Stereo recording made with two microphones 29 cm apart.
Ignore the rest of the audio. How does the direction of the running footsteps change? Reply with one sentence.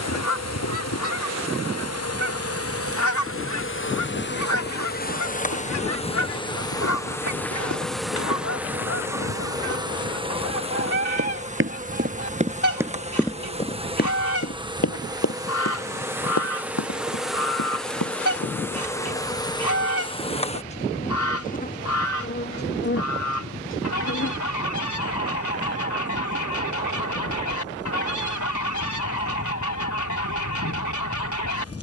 You can hear the running footsteps go from the right side to the left.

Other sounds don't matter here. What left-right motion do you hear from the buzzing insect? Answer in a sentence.
You can hear the buzzing insect go right and come back.